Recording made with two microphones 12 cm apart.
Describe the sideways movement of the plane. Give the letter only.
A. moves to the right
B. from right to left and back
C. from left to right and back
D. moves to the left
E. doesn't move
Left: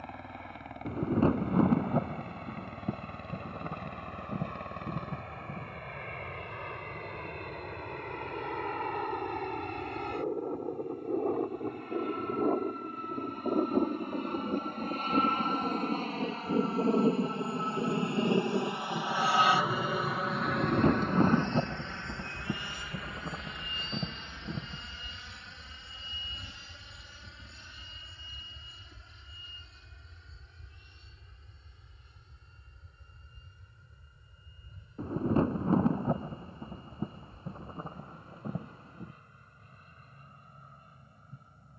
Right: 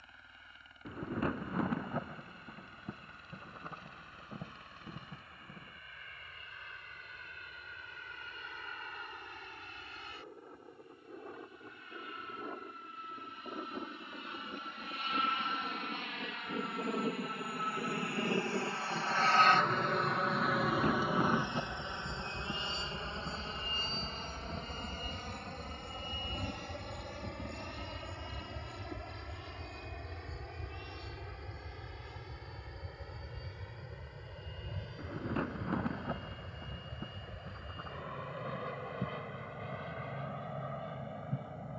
A.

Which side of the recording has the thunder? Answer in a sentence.
In this clip you hear the thunder on the left.